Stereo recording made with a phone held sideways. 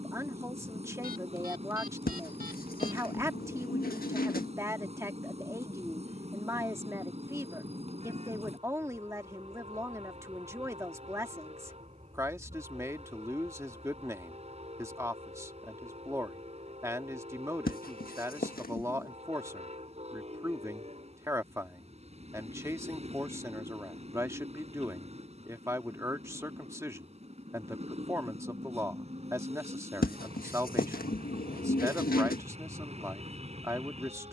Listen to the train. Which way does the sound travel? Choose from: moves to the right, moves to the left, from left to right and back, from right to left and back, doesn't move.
doesn't move.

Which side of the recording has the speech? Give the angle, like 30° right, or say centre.
20° right.